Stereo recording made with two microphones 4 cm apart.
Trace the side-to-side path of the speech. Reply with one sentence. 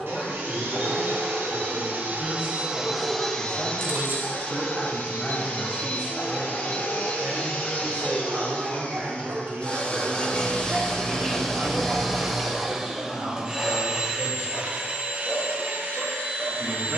In this clip you hear the speech go from the left side to the right.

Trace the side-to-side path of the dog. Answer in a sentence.
In this clip you hear the dog move from left to right and back again.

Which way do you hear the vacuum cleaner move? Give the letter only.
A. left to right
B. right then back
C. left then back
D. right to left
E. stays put
C.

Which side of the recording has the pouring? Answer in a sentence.
In this clip you hear the pouring on the right.